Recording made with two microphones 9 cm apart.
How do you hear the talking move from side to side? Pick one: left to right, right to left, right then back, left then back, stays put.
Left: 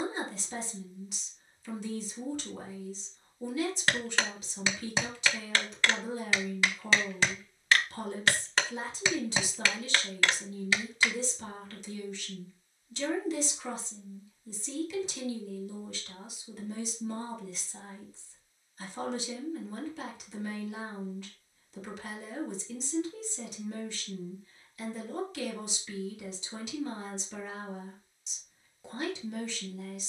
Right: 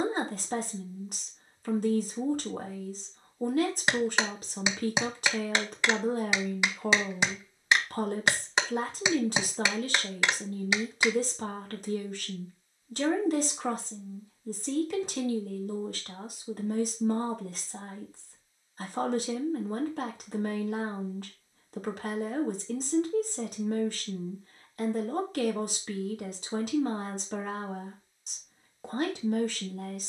stays put.